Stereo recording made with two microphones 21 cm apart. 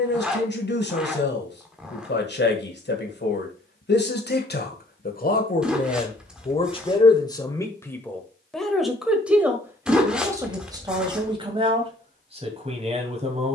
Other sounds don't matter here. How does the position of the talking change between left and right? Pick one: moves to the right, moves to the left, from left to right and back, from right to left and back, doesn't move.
moves to the right.